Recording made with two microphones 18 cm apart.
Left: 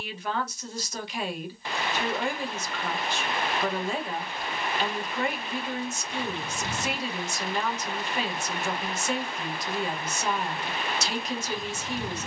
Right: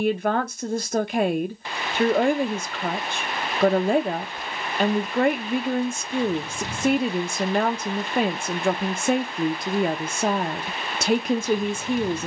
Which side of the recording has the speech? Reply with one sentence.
You can hear the speech on the right.